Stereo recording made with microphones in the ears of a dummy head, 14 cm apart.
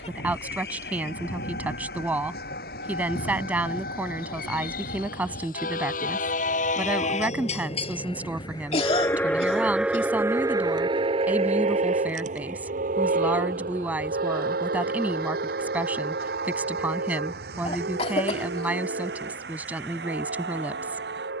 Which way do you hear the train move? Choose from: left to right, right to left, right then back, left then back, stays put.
left to right.